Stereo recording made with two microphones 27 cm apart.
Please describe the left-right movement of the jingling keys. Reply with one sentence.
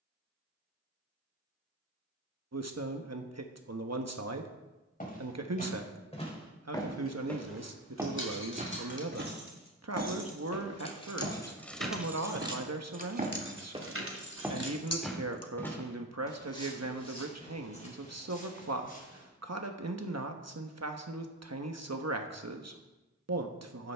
You can hear the jingling keys go from the left side to the right.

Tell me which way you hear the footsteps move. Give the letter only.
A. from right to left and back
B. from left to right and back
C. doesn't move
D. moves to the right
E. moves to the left
B.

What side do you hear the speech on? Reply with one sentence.
You can hear the speech on the right.